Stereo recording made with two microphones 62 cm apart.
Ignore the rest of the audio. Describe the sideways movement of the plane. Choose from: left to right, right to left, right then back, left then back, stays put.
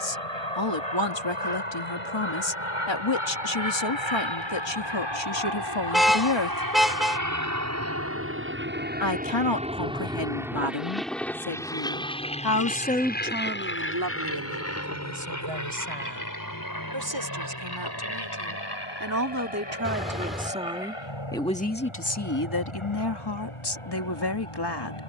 right to left.